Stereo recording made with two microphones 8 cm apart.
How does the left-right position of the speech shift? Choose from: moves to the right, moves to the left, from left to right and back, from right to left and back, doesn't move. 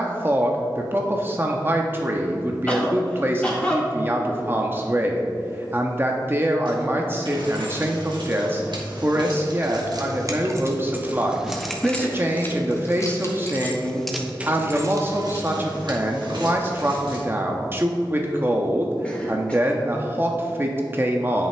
doesn't move.